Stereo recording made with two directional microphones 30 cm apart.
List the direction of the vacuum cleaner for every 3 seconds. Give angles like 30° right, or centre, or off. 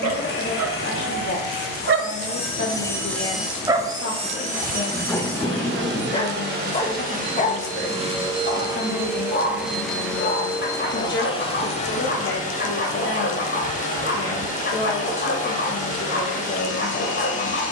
30° left, 20° right, 30° right, 10° left, 30° left, 30° left.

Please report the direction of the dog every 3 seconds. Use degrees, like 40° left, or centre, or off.
50° right, centre, 20° left, 30° left, 30° left, 30° left.